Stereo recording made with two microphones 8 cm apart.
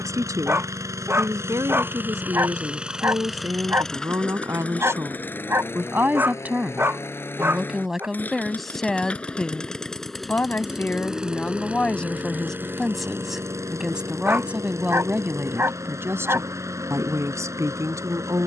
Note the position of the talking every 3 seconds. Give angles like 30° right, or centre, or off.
40° right, 40° right, 10° right, 20° left, centre, 30° right.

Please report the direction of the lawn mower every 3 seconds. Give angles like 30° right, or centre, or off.
30° right, 10° left, 30° left, centre, 30° right, 40° right.